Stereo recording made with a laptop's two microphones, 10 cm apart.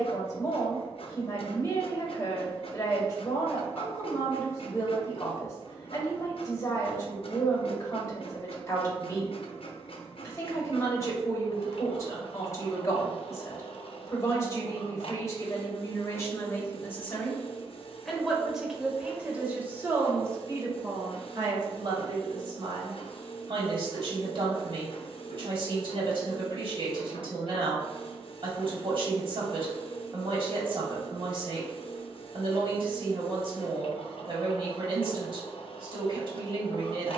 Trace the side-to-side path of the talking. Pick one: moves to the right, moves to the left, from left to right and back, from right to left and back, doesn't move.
moves to the right.